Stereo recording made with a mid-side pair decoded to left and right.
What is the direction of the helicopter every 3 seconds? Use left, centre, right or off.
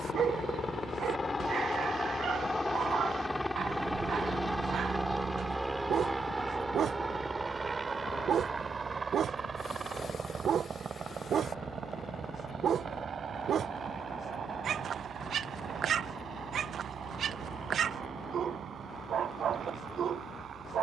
left, centre, right, right, right, right, right.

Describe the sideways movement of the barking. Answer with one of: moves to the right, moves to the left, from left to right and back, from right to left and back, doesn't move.
doesn't move.